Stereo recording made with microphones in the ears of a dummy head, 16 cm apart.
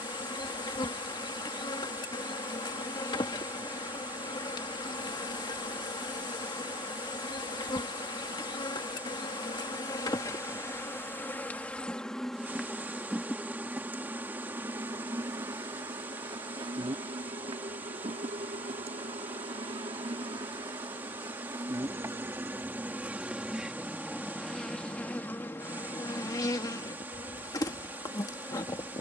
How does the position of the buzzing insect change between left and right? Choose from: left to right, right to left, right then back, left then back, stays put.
right then back.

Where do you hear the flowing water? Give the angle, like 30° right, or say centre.
10° right.